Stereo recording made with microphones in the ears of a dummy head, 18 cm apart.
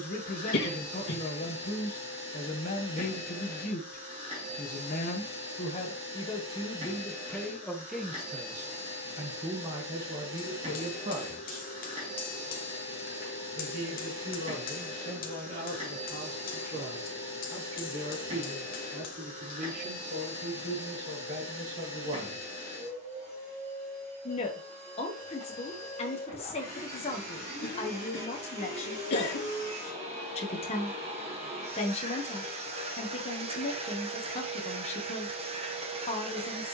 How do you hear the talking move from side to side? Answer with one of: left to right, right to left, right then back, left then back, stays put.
right then back.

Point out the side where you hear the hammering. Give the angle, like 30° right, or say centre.
40° left.